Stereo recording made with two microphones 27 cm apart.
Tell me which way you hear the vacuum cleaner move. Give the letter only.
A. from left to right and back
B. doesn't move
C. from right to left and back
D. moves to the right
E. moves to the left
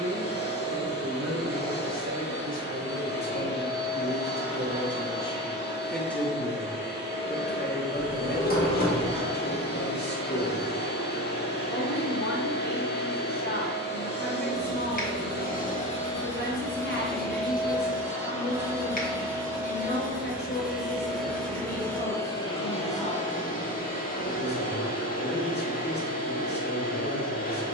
A.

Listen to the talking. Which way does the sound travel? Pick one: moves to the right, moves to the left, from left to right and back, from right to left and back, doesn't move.
moves to the left.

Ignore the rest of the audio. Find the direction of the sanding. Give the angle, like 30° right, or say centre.
30° left.